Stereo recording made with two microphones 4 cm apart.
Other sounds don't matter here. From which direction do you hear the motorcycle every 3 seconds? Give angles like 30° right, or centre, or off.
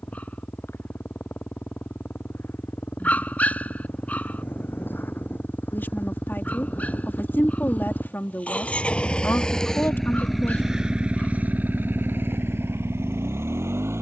60° left, 50° left, 40° left, 10° right, 70° right.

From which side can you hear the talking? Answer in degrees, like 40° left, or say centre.
50° left.